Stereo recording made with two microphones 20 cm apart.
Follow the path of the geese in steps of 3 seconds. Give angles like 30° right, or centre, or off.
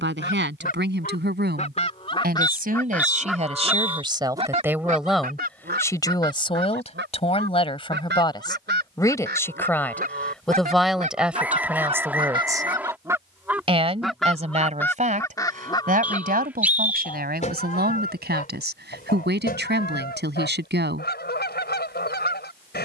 30° left, 30° right, 60° right, 40° right, 10° right, 30° left, 50° left, 50° left.